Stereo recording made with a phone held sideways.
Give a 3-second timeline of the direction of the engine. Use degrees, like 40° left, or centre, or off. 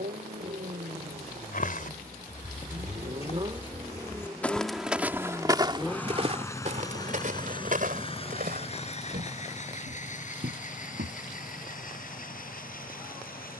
50° right, 10° right, 30° left, 50° left, 60° left.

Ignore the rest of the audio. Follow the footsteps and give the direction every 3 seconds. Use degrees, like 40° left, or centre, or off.
50° left, centre, 50° right, 70° right, off.